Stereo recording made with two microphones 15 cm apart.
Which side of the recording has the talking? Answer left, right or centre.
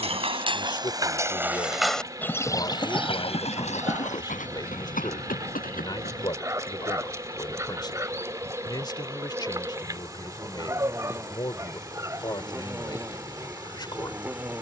left.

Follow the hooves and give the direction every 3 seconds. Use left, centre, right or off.
centre, left, left, off, off.